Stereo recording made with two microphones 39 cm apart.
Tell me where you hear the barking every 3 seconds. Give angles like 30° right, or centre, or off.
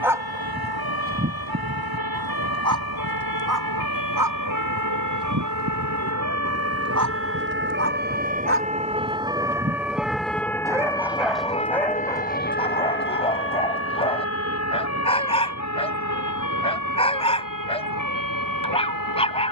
30° right, 60° right, 40° right, 10° right, 10° left, 10° left, 10° left.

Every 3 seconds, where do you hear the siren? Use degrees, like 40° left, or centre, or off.
70° right, 50° right, 30° right, centre, 30° left, 50° left, 50° left.